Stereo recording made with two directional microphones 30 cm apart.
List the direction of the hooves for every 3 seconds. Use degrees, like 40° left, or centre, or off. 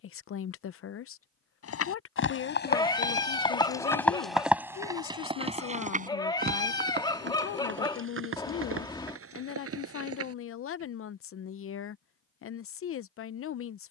40° left, centre, 40° right, 50° right, off.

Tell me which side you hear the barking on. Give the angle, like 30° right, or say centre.
10° left.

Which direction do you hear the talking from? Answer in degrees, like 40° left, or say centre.
50° left.